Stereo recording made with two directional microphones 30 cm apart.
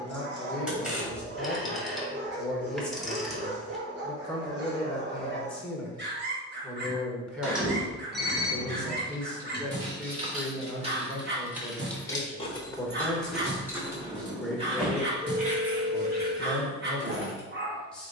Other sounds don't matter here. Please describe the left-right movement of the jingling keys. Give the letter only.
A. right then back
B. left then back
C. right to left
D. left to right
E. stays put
B.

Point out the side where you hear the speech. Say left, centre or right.
centre.